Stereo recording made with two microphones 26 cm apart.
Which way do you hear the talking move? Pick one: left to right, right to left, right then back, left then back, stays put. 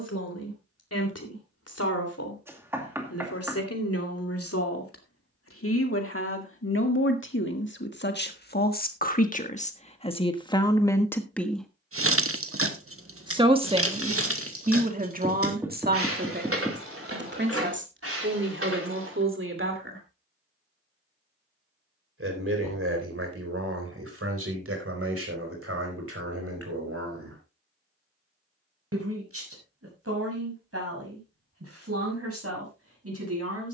left to right.